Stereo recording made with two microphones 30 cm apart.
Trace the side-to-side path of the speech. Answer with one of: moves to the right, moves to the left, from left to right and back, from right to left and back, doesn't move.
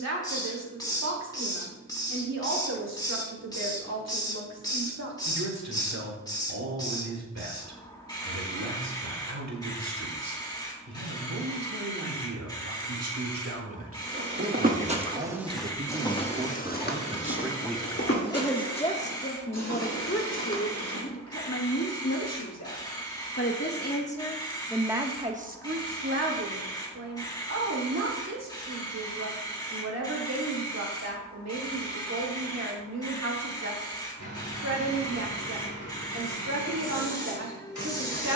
from right to left and back.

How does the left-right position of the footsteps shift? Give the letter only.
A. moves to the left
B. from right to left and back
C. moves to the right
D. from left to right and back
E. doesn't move
A.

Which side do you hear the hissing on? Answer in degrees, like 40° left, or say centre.
10° left.